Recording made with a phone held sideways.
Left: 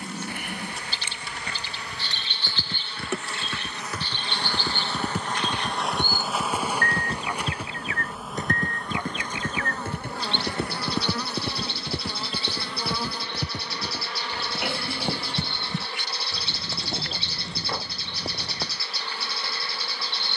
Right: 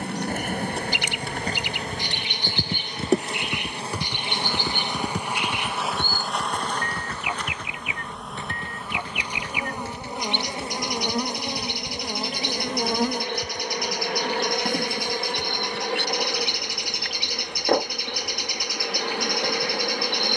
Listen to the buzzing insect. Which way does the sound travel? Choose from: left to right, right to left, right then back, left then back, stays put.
left then back.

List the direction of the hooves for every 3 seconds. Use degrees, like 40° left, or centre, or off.
40° right, 10° right, 30° left, 50° left, 70° left, 70° left, 80° left.